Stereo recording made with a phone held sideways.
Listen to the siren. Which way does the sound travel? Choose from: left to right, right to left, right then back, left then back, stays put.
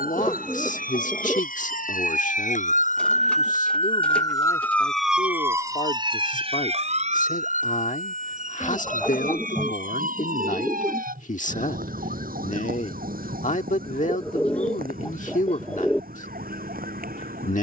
left to right.